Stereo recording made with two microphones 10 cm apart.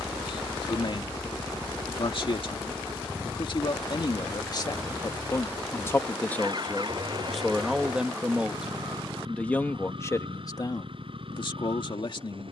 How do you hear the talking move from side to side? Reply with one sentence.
You can hear the talking go right and come back.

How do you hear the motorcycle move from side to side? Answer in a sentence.
In this clip you hear the motorcycle travel towards the right.